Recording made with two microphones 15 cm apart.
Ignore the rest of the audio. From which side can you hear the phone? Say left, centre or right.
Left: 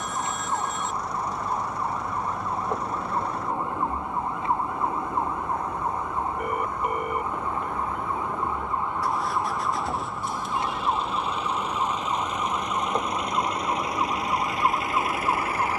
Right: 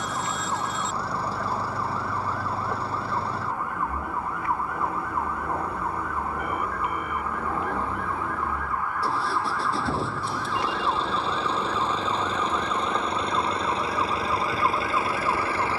left.